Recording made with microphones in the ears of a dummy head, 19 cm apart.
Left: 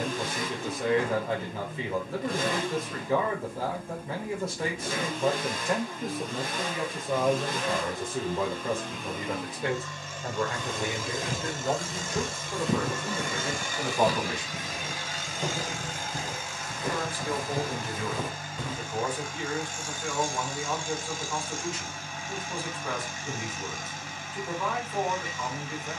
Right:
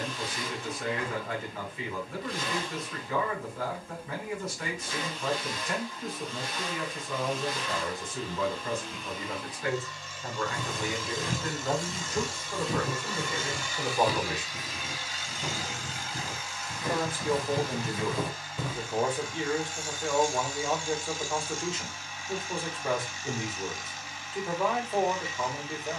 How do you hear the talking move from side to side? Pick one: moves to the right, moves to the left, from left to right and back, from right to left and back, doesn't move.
moves to the right.